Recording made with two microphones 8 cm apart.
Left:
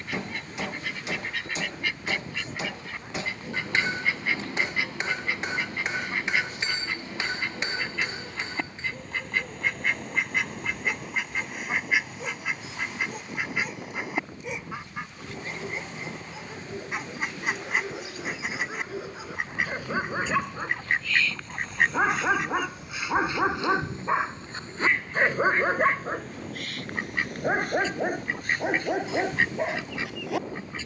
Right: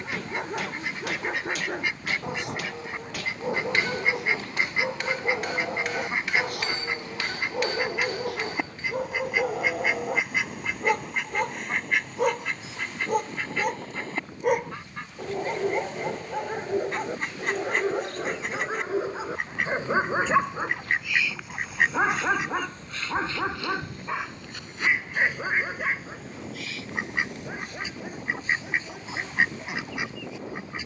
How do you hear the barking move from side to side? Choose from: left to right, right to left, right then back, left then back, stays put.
right to left.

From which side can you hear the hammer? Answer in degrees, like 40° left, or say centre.
20° left.